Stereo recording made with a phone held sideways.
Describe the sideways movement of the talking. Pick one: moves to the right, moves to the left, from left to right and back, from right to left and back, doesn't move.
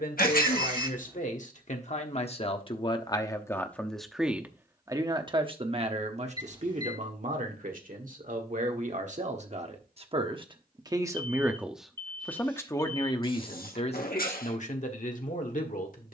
from left to right and back.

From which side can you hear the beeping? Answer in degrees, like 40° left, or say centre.
30° right.